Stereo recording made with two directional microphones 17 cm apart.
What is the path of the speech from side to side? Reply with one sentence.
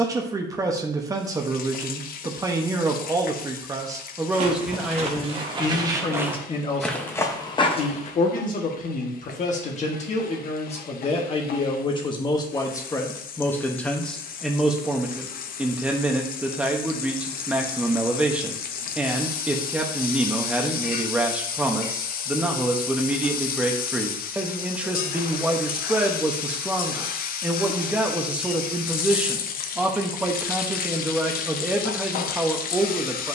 In this clip you hear the speech move from right to left and back again.